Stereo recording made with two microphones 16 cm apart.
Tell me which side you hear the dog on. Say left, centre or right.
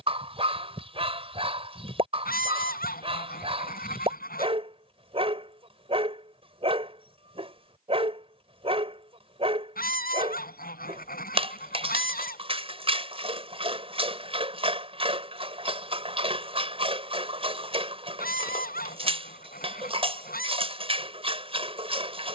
right.